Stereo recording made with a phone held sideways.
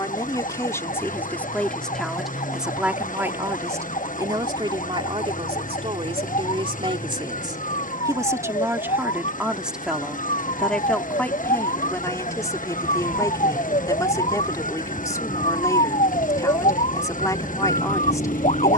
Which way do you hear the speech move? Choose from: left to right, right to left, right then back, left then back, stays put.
right then back.